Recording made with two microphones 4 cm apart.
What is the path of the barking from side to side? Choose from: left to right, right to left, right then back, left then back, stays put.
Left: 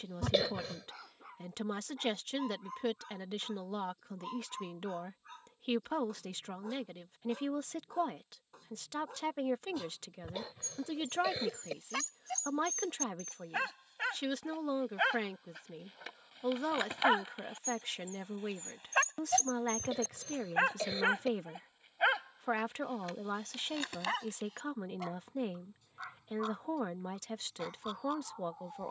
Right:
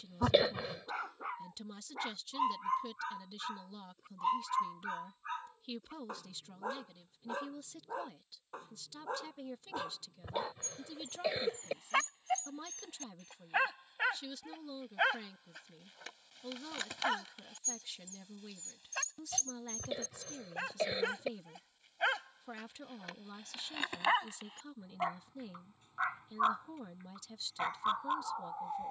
left then back.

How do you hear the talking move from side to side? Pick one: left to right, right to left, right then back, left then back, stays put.
stays put.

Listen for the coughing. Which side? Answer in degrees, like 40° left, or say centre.
10° right.